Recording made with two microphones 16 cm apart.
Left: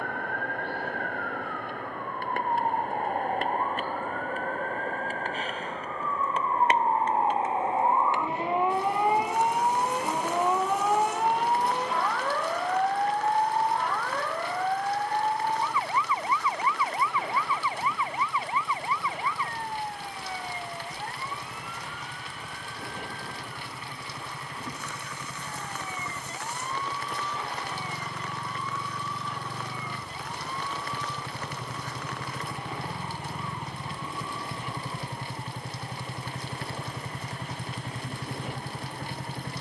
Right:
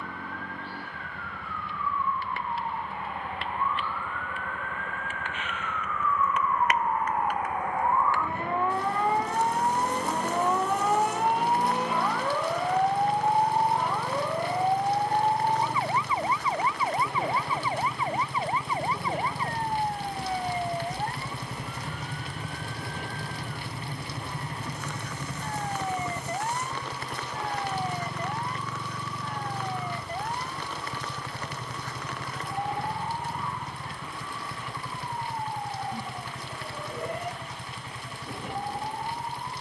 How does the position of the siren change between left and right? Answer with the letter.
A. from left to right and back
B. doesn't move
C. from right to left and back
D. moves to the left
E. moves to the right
E.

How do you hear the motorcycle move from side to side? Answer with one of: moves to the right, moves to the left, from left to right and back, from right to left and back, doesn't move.
moves to the left.